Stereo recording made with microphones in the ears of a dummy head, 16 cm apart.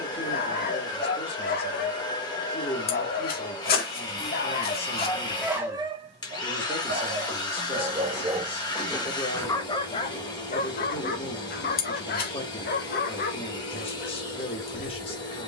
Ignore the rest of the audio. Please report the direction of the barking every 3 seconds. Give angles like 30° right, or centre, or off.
60° left, 20° left, 30° right, 40° left, 50° left.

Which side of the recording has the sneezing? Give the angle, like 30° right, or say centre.
60° left.